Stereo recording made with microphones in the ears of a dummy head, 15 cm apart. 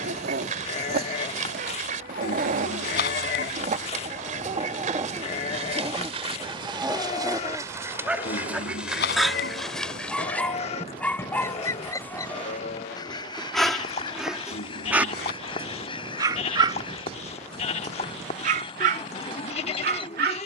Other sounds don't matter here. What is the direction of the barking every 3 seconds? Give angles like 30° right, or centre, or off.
60° right, 40° right, 20° right, 10° left, centre, 30° right, 60° right.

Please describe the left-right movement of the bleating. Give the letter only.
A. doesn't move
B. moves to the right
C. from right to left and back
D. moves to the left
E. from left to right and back
A.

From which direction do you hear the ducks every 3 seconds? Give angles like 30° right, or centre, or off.
50° right, 50° right, 20° right, 10° left, 30° left, 30° left, 30° left.